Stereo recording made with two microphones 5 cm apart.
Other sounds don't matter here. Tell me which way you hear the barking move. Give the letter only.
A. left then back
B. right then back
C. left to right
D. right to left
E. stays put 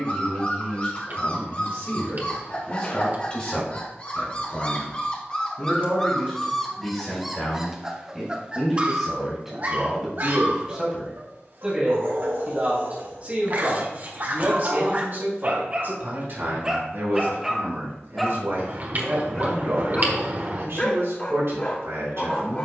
B.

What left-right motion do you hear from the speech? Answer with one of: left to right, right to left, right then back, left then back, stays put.
left to right.